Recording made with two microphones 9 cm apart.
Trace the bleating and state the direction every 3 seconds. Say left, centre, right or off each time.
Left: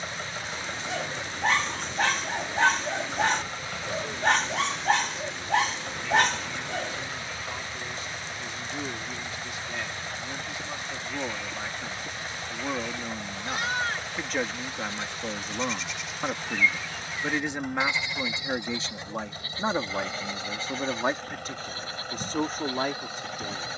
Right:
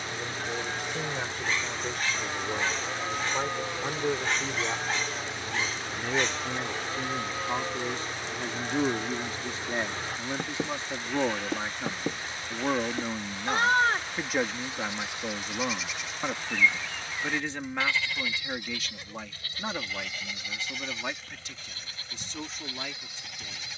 right, right, right, right, right, centre, left, left.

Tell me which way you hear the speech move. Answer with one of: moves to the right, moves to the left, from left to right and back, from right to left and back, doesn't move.
moves to the left.